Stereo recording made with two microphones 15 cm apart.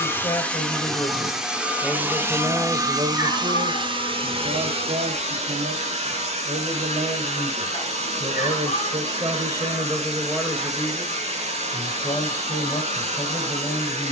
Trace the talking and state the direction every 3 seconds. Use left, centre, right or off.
centre, right, right, centre, left.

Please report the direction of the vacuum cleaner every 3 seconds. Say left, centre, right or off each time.
centre, right, right, right, right.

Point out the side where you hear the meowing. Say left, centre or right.
left.